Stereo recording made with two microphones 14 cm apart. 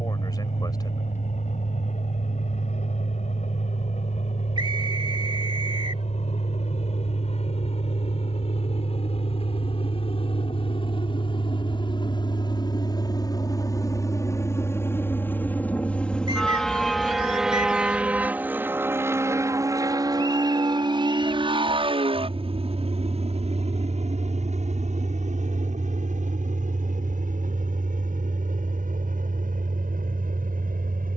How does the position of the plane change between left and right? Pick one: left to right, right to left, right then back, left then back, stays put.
left to right.